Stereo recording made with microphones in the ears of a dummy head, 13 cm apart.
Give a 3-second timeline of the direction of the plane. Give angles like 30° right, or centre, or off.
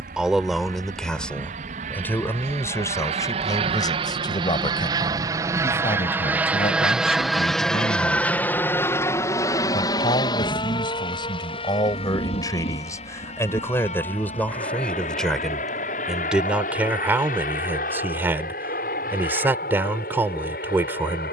60° right, 30° right, centre, 30° left, 40° left, 50° left, 60° left.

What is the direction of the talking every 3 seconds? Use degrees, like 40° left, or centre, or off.
10° left, 30° left, 40° left, 30° left, 20° left, 10° right, 10° right.